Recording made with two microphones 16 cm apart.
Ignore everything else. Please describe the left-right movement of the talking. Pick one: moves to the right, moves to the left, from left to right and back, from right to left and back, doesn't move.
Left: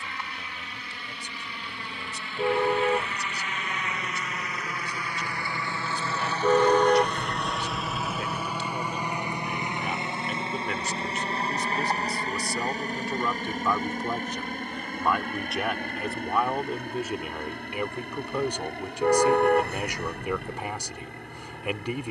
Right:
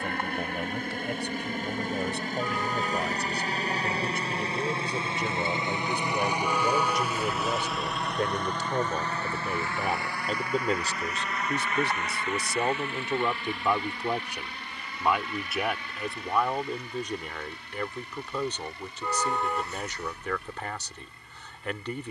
moves to the left.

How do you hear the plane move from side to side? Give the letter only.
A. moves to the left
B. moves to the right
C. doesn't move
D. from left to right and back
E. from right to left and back
A.